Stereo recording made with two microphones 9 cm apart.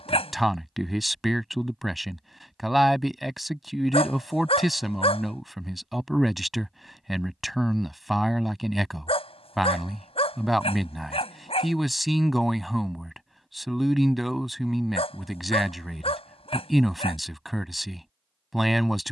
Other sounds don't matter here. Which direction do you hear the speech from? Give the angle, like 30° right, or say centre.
centre.